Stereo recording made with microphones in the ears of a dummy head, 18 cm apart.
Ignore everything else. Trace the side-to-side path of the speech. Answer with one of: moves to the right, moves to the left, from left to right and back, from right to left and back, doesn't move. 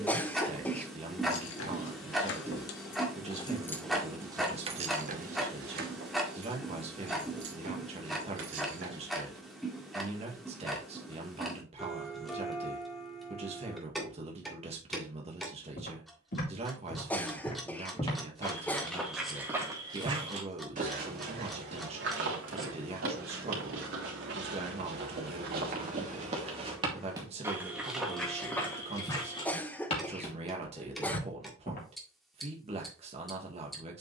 doesn't move.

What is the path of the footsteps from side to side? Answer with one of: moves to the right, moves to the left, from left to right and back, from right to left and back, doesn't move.
from left to right and back.